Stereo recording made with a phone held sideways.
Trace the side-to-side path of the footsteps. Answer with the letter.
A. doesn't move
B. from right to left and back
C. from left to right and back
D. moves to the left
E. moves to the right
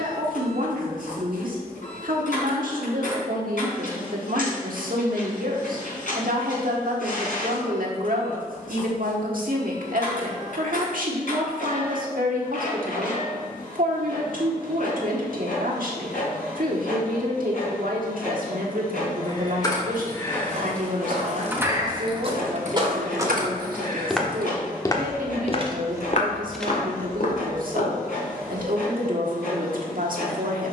D.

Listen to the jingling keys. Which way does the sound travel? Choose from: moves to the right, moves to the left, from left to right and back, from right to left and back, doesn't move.
from left to right and back.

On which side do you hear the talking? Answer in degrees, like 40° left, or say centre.
70° right.